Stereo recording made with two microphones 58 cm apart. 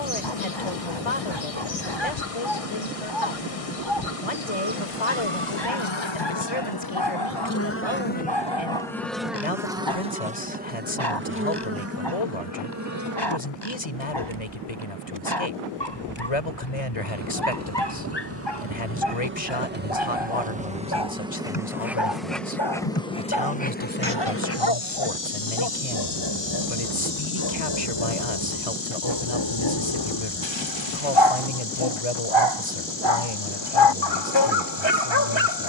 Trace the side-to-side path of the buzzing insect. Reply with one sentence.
In this clip you hear the buzzing insect move from left to right and back again.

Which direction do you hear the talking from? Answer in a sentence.
In this clip you hear the talking on the left.